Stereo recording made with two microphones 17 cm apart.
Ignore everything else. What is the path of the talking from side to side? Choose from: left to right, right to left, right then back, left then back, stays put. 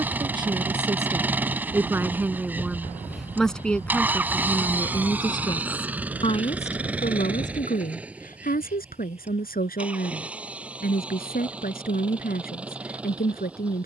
right to left.